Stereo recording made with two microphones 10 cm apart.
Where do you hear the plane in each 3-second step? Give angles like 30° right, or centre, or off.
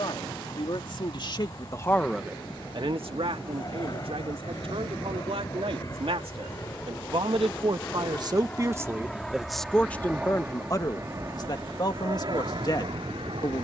50° left, 40° left, 20° left, 20° right, 50° right.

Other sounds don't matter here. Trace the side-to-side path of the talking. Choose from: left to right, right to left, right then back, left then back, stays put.
right then back.